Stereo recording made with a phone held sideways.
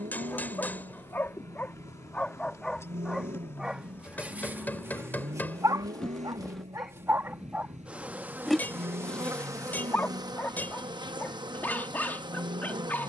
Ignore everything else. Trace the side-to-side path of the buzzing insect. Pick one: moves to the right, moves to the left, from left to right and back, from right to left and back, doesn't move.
moves to the right.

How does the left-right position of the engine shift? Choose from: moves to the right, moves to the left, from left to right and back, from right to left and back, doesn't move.
doesn't move.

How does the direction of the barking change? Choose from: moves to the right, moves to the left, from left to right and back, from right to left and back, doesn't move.
from left to right and back.